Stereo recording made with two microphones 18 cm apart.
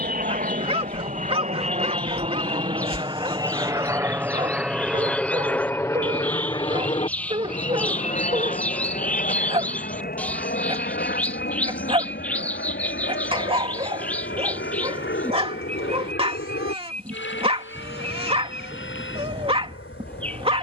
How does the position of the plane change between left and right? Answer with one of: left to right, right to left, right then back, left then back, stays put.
right to left.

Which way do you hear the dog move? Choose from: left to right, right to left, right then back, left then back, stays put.
stays put.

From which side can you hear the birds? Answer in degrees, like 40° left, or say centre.
10° left.